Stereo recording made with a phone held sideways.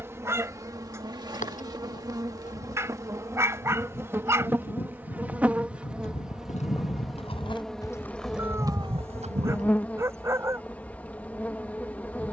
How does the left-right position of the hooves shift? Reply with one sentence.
In this clip you hear the hooves travel towards the right.